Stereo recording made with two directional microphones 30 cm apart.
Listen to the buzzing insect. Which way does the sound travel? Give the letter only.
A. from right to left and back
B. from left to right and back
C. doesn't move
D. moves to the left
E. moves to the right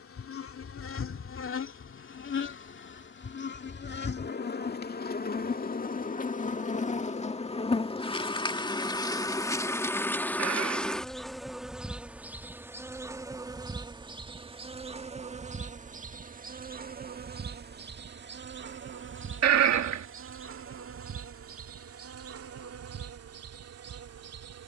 E.